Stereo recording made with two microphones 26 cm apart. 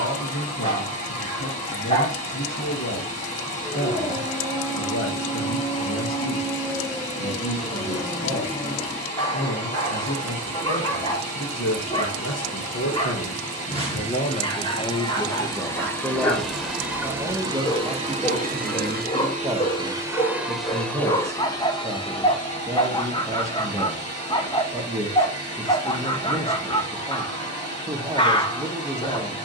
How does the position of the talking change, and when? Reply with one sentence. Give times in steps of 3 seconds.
You can hear the talking on the left from 0 s and in the centre from 15 s.